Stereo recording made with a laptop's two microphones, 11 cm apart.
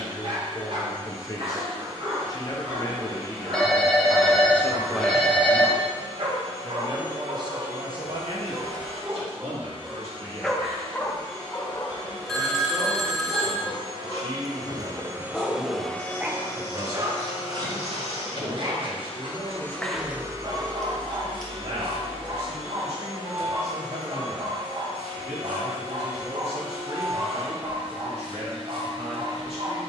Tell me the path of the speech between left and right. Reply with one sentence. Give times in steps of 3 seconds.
In this clip you hear the speech on the left from 0 s, in the centre from 3 s and on the right from 6 s.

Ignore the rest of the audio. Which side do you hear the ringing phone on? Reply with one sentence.
In this clip you hear the ringing phone in the centre.